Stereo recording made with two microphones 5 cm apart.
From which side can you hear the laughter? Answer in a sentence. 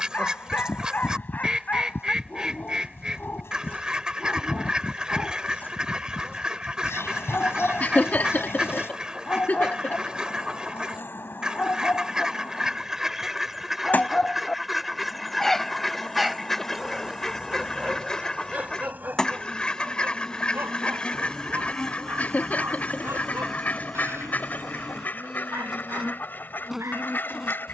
In this clip you hear the laughter on the left.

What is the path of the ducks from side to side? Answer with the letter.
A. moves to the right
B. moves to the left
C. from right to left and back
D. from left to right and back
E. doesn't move
B.